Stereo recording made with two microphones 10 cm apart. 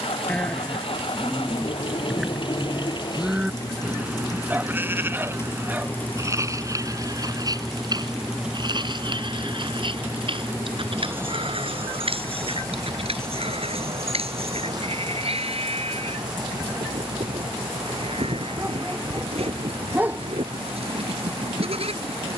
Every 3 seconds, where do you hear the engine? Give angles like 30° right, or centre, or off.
60° left, 30° left, centre, 20° right, 40° right, 40° right, 50° right, 50° right.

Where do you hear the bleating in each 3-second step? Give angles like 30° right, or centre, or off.
centre, 20° right, 40° right, 60° right, 70° right, 70° right, 70° right, 70° right.